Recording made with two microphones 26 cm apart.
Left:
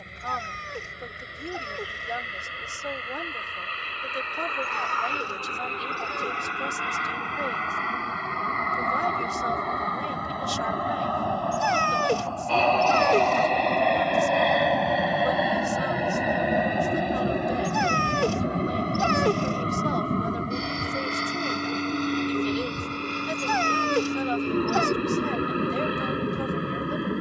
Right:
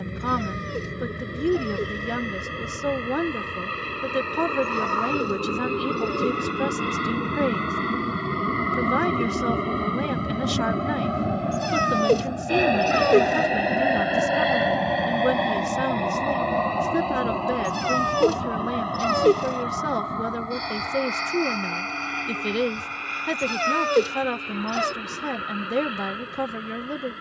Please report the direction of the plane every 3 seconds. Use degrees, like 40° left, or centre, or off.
60° right, 60° right, 50° right, 30° right, 10° right, 10° left, 30° left, 40° left, 50° left.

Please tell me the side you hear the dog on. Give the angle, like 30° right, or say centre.
40° right.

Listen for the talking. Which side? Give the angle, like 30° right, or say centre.
70° right.